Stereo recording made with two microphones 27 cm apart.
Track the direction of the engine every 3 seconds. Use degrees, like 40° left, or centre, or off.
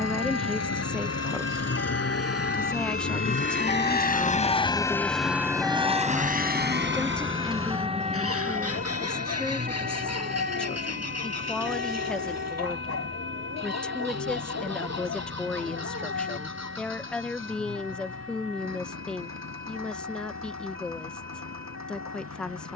70° left, 20° left, 50° right, 70° right, 70° right, 80° right, 80° right, 80° right.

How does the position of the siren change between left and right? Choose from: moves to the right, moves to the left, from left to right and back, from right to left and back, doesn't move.
moves to the right.